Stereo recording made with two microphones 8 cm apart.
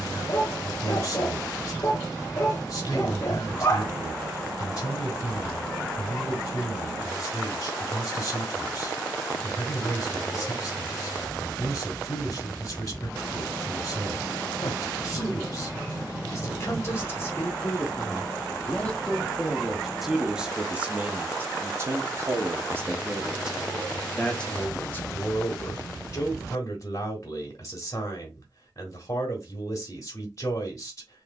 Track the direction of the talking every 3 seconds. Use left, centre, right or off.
left, left, left, left, left, left, centre, right, left, left, left.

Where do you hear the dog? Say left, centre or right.
left.